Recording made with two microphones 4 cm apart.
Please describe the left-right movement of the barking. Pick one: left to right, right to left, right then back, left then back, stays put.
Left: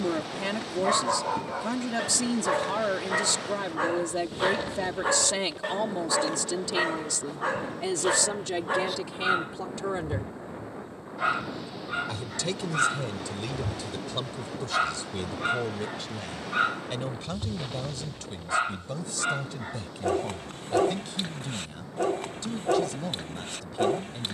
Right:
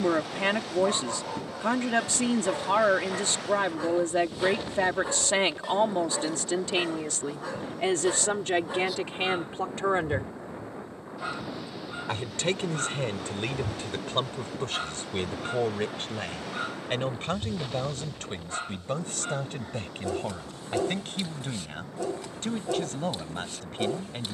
stays put.